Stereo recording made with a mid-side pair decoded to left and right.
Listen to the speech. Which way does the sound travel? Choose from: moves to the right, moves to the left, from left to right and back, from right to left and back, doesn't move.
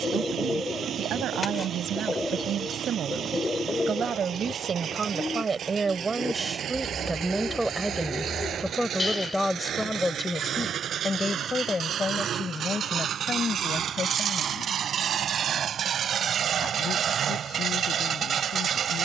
moves to the left.